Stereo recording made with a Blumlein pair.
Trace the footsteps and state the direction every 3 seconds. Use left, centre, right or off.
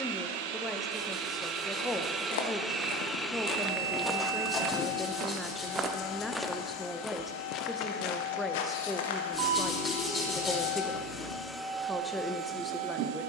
left, centre, left, left, off.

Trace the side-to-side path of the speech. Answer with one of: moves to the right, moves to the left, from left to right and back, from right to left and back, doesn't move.
doesn't move.